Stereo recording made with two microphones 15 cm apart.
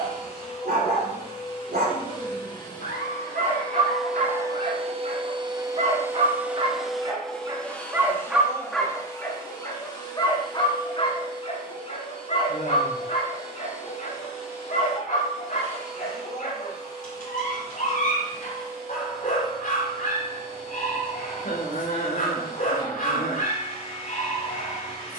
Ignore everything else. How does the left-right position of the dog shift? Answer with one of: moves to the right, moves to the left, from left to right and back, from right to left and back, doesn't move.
moves to the left.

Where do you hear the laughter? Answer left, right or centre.
left.